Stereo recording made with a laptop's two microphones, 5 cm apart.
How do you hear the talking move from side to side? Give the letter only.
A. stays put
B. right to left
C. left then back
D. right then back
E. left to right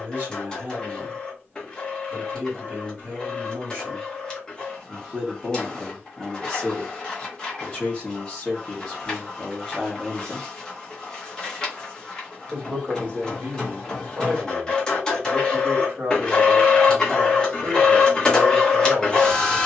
C.